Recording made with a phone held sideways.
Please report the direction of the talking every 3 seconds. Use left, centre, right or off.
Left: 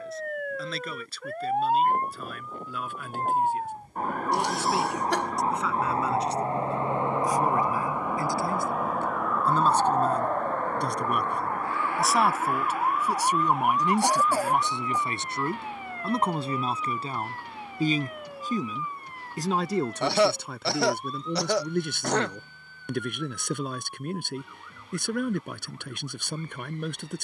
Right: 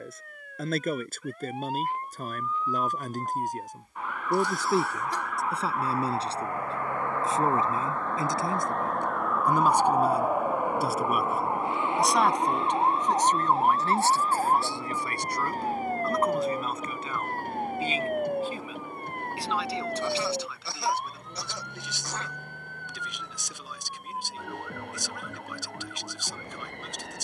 right, right, right, centre, centre, left, left, left, left.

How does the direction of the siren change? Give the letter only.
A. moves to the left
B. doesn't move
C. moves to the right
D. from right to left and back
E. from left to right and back
C.